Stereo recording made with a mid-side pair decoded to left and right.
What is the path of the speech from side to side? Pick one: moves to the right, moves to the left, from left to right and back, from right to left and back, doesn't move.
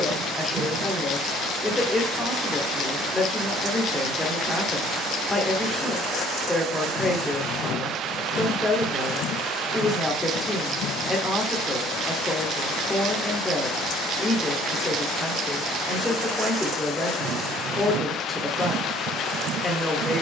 doesn't move.